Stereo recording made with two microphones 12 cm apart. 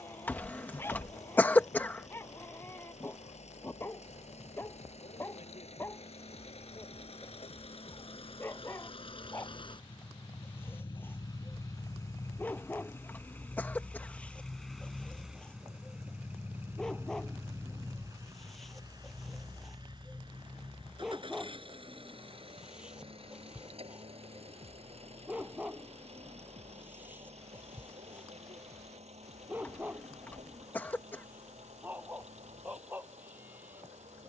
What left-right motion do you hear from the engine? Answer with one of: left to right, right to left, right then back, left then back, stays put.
left to right.